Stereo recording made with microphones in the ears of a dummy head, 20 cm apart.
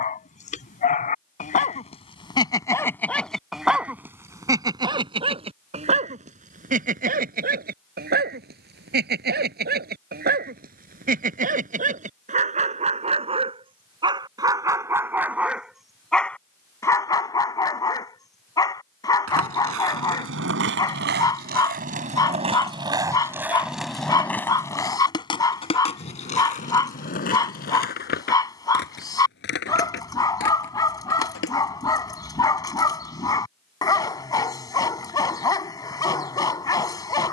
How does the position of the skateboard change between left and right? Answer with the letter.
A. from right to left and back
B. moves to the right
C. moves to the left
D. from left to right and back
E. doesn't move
C.